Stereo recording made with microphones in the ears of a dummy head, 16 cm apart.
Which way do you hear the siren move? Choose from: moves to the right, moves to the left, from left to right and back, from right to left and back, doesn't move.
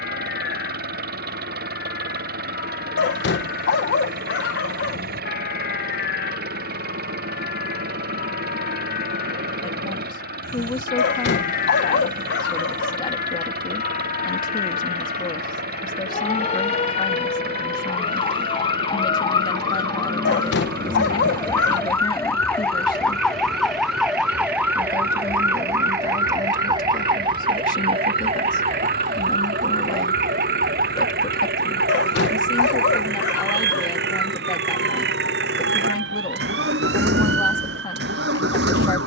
moves to the right.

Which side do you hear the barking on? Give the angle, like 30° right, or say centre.
70° left.